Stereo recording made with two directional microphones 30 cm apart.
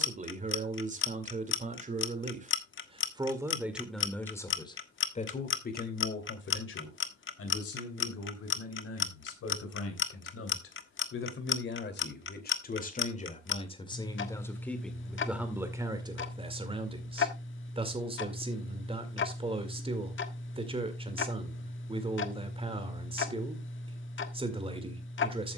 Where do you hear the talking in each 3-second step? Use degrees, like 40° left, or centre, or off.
20° right, 10° left, 50° left, 50° left, 20° left, 10° right, 20° right, 20° right, 20° right.